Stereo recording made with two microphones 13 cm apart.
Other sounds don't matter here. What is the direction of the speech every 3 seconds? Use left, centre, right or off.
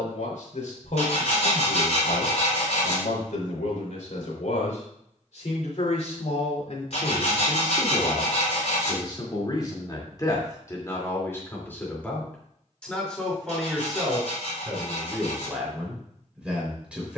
left, left, left, left, centre, centre.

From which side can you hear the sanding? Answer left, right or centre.
left.